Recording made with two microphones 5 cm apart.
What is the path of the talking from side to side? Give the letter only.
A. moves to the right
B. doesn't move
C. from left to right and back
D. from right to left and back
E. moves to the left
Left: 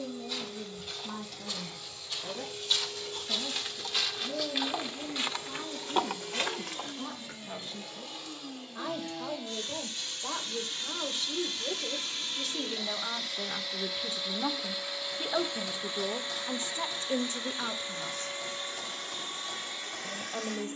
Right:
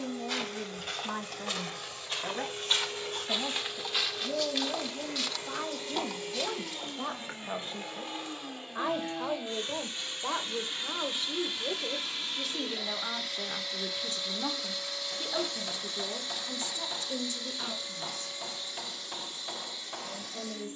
E.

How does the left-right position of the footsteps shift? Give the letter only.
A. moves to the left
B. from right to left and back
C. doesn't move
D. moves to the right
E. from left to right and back
A.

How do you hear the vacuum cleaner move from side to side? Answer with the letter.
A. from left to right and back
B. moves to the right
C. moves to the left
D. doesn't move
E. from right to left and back
C.